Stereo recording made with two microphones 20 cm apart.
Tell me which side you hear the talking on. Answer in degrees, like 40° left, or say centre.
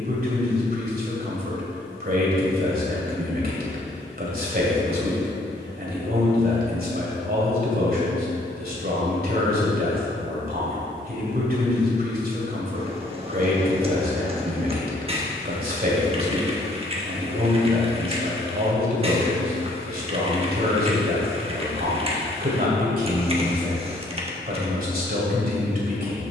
50° right.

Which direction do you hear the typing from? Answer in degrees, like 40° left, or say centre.
30° right.